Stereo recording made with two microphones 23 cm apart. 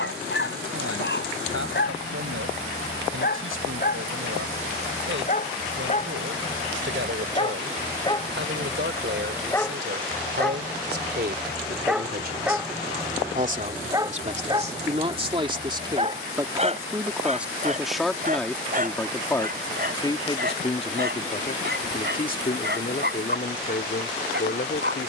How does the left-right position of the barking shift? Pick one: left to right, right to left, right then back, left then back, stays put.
left to right.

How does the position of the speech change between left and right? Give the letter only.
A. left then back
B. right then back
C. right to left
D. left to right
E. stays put
C.